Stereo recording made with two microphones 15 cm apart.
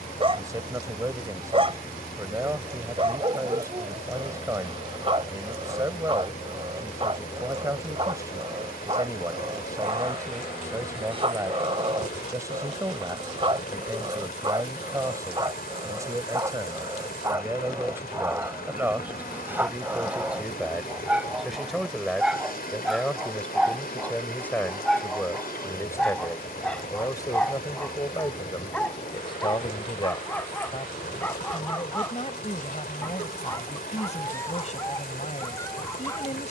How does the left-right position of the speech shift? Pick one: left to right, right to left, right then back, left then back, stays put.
right to left.